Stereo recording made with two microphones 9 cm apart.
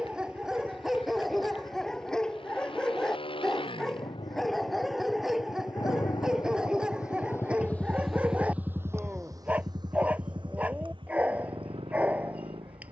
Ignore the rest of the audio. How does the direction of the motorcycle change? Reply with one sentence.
In this clip you hear the motorcycle go from the left side to the right.